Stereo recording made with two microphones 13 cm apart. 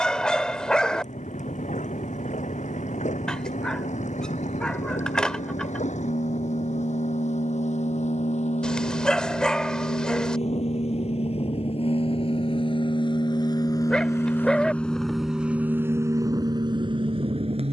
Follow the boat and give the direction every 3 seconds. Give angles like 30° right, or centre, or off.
70° left, 70° left, 70° left, 60° left, 30° left, 30° right.